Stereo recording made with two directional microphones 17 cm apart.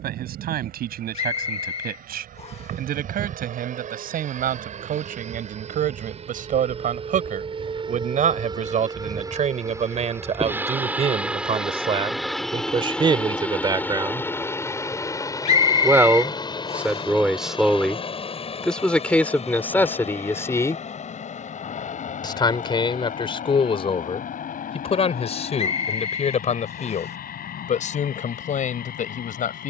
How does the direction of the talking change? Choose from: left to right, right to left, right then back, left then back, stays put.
right to left.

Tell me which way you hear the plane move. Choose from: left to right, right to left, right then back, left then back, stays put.
right to left.